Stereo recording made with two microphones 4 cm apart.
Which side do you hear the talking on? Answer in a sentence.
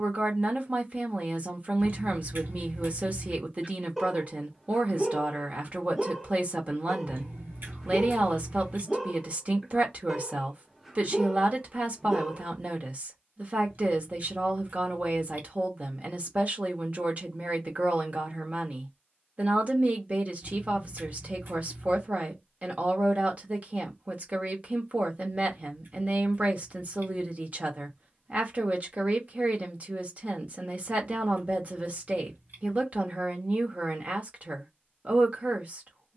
You can hear the talking on the right.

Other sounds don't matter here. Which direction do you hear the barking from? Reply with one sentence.
In this clip you hear the barking in the centre.